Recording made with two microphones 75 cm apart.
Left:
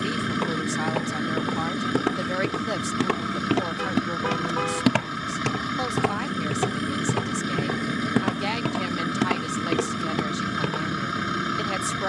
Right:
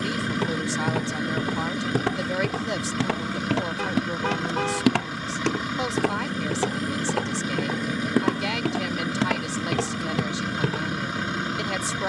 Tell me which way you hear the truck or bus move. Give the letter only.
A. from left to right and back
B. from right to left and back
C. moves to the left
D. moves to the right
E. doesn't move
E.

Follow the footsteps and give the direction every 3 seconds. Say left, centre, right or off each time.
right, centre, left, right.